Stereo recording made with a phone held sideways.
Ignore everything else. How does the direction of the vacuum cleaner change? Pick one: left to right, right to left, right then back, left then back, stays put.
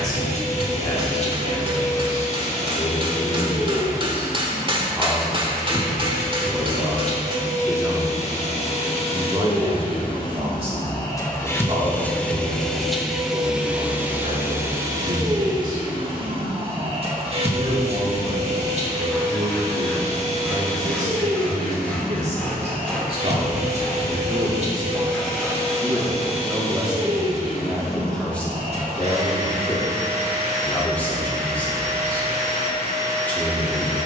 left to right.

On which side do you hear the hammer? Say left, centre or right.
right.